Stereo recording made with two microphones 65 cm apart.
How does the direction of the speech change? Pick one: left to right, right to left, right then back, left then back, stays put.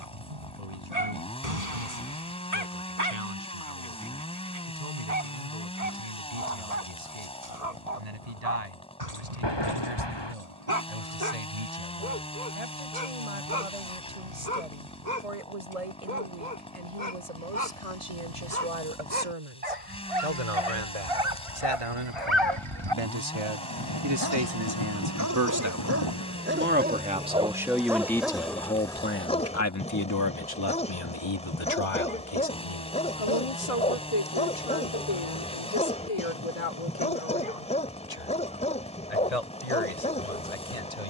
right to left.